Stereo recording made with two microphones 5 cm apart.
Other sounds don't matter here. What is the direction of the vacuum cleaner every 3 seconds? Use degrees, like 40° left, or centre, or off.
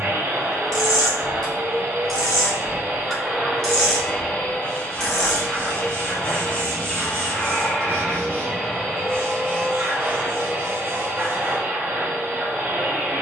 40° right, 20° left, 10° left, 20° right, 30° right.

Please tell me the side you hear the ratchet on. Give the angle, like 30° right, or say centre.
10° left.